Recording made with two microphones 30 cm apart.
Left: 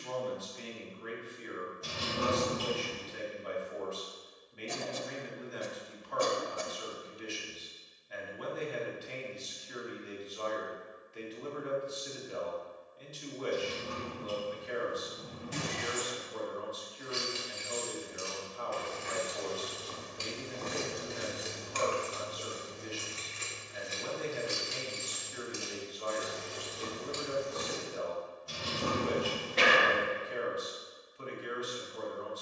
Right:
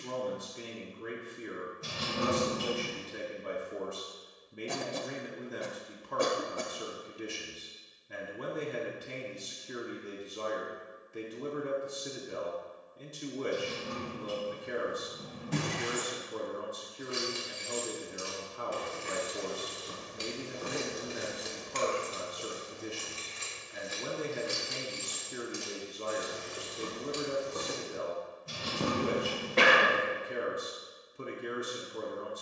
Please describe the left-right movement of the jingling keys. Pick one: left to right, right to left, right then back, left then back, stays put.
left then back.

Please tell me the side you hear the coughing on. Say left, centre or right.
right.